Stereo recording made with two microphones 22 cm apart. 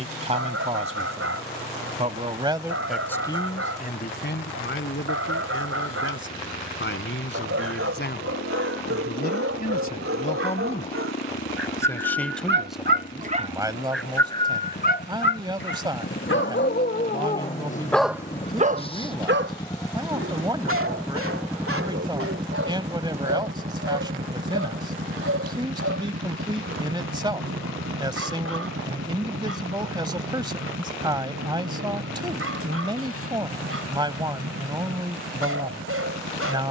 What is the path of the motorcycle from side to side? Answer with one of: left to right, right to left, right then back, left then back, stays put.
left to right.